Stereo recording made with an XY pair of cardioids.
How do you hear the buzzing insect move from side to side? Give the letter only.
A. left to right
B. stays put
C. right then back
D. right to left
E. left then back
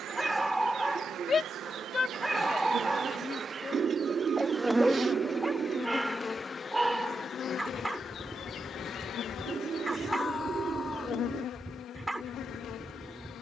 D.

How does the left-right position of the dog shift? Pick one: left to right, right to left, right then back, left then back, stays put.
stays put.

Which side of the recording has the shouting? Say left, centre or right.
left.